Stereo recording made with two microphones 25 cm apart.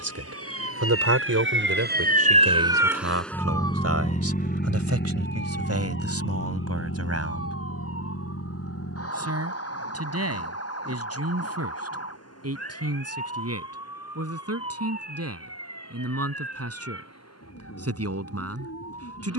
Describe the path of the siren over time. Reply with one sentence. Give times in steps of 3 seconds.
In this clip you hear the siren on the right from 0 s and on the left from 3 s.